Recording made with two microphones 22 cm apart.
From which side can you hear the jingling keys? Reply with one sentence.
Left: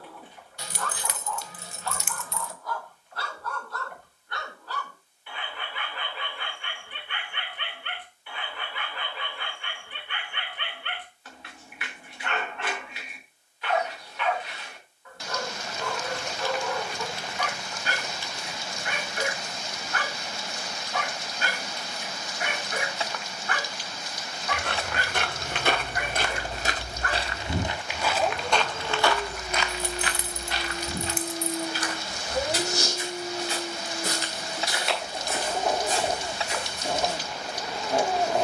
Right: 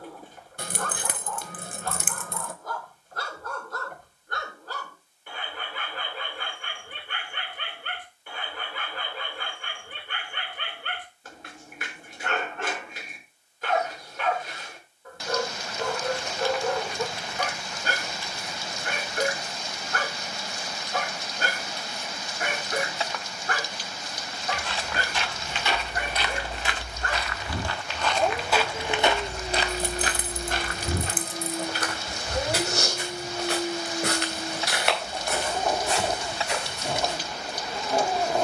You can hear the jingling keys on the right.